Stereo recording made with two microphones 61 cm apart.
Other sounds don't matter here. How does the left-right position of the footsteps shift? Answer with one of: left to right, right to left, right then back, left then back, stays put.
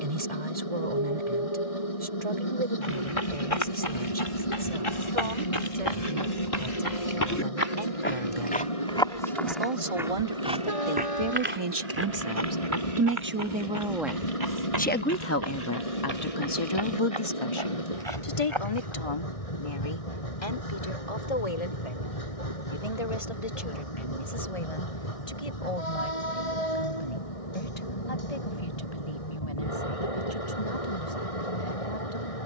left to right.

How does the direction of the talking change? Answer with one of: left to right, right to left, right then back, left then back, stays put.
right to left.